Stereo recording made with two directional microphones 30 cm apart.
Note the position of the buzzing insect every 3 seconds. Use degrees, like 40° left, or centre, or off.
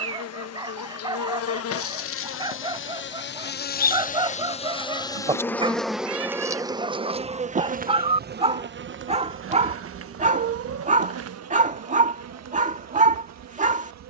50° left, 20° left, 20° right, 50° right, 60° right.